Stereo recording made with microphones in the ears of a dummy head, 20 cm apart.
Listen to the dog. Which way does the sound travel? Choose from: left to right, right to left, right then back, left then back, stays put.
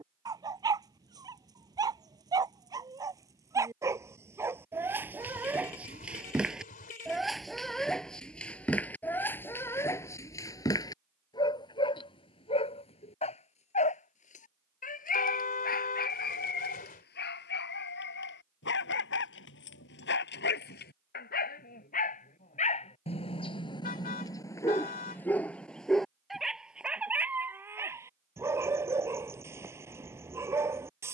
left then back.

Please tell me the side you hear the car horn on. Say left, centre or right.
left.